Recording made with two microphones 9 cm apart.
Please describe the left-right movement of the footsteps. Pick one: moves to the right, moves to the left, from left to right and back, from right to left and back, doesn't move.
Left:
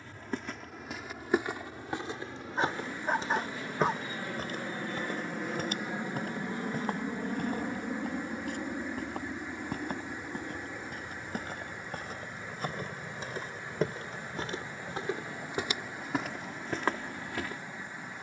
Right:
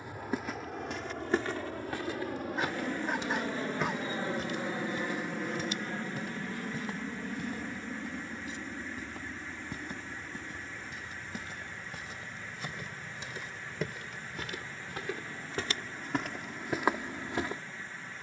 from right to left and back.